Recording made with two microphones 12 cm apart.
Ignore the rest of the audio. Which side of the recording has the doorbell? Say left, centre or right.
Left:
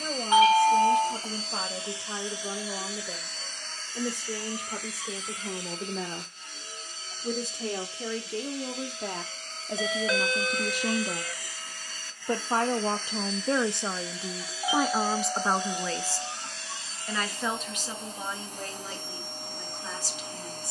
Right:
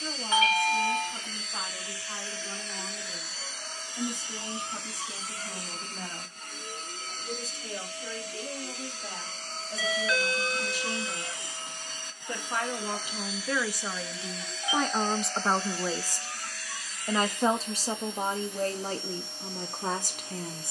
left.